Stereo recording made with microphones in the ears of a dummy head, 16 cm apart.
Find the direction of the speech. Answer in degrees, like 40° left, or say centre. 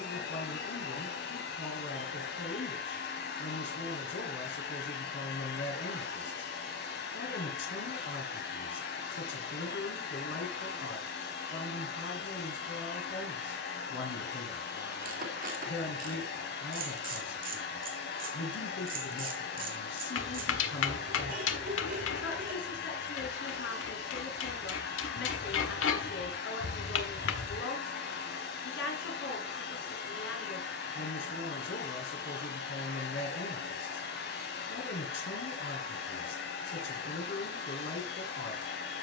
70° left.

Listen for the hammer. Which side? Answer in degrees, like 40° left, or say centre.
80° left.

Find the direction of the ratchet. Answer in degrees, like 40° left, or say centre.
50° right.